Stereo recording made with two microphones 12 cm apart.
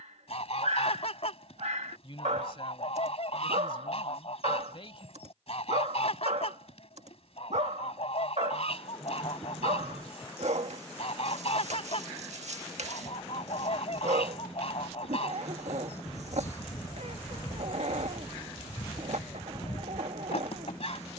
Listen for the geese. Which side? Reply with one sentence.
You can hear the geese on the left.